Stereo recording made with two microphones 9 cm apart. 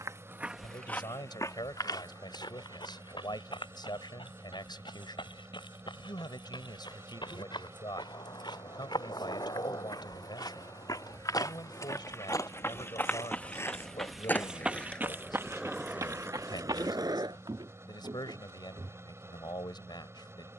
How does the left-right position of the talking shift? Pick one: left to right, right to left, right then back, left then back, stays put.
stays put.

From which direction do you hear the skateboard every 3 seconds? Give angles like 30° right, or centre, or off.
off, off, 50° left, 50° left, 30° left, 20° right, off.